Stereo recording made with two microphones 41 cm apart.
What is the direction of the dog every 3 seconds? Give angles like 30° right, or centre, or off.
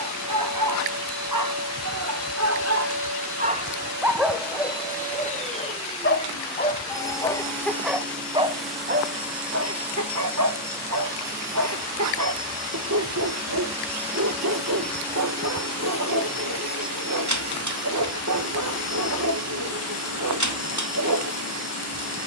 40° right, 10° left, centre, 40° right, 40° right, 40° right, 40° right, 40° right.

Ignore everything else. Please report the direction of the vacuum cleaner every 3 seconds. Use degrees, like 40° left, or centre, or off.
40° left, 20° left, 10° left, 10° right, 10° right, 20° left, 40° left, 40° left.